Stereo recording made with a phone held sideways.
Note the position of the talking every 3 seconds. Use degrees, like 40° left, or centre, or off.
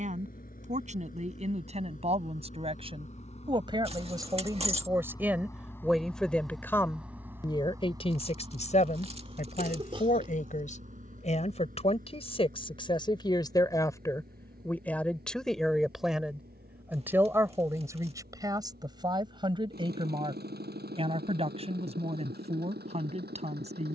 40° right, 20° right, 30° left, 50° left, 20° left, 10° right, 30° right, 40° right.